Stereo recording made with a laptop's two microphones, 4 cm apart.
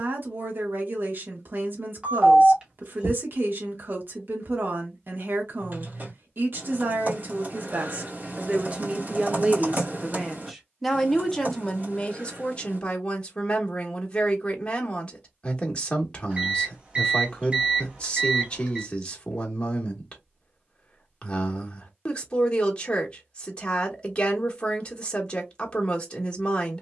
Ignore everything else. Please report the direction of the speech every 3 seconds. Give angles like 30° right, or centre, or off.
50° right, 50° right, 40° right, centre, 20° left, 20° left, 20° left, 20° left, 20° left.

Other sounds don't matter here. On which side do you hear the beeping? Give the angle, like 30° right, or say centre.
20° right.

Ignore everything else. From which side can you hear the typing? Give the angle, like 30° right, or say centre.
40° right.